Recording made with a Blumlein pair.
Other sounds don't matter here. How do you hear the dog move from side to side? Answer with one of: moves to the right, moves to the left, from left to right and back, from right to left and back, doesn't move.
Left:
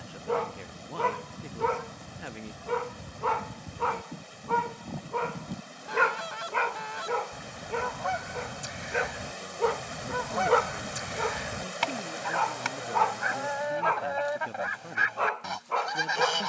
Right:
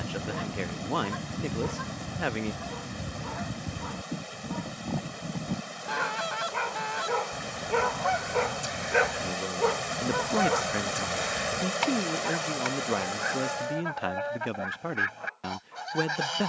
from left to right and back.